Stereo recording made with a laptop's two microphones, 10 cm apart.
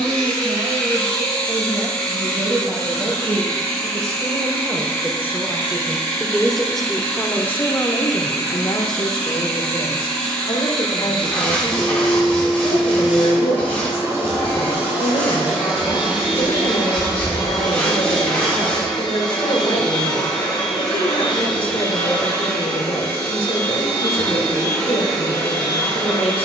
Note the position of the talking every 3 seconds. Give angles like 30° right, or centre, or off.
40° right, 20° right, 20° left, 60° left, 70° left, 70° left, 70° left, 70° left, 70° left.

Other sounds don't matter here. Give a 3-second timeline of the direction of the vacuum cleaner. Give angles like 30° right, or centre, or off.
20° left, 20° left, 20° left, 10° left, 20° right, 10° right, 10° left, 10° left, 10° left.